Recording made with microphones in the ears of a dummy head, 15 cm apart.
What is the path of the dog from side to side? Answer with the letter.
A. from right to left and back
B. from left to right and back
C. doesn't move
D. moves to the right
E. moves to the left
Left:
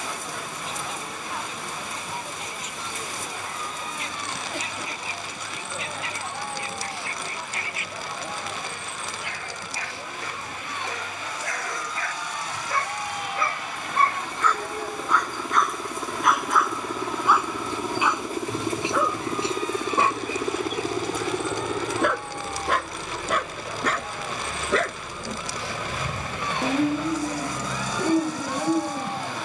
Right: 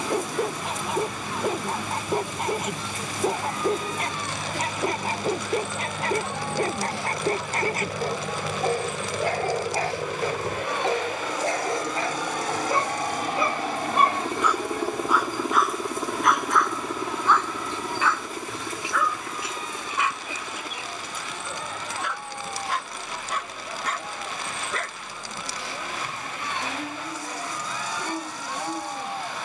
E.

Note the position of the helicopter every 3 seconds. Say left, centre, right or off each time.
right, right, right, right, right, centre, left, left, left, left.